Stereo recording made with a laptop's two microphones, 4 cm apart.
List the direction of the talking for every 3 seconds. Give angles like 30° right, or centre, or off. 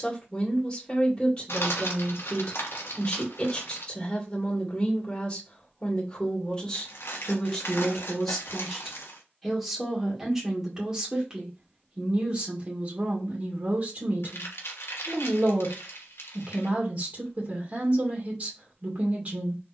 20° left, 20° left, 10° left, 10° right, 30° right, 40° right, 40° right.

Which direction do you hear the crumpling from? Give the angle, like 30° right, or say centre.
70° left.